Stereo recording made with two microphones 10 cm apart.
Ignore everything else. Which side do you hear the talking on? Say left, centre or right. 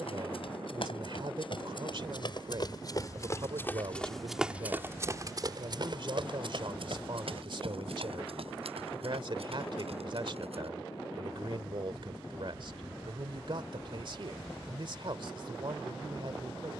right.